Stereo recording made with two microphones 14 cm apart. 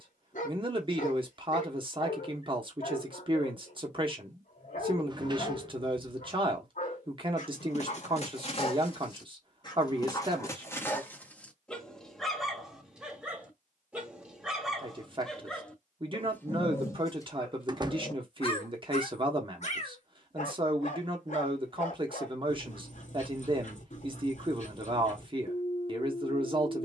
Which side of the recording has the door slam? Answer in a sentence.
You can hear the door slam on the right.